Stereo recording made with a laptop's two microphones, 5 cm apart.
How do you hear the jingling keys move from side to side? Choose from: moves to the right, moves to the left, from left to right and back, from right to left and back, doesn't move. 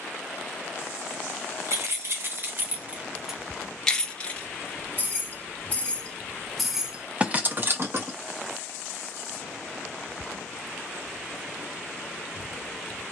from right to left and back.